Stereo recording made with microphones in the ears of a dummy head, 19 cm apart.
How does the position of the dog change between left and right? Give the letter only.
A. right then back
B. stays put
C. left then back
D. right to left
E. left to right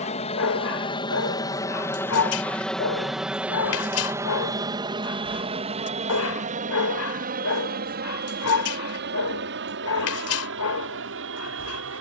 B.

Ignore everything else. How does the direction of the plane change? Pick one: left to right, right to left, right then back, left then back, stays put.
left to right.